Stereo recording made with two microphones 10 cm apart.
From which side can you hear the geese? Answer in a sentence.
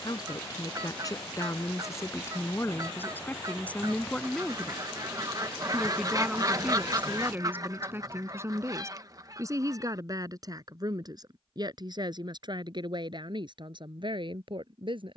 You can hear the geese on the right.